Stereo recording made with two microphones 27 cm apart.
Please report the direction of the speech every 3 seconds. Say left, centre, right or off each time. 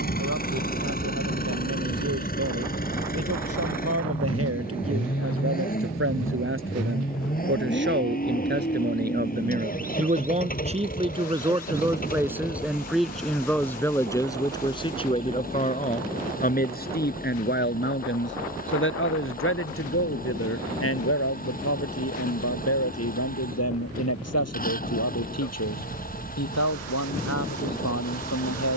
right, right, right, right, centre, left, left, left, left, left.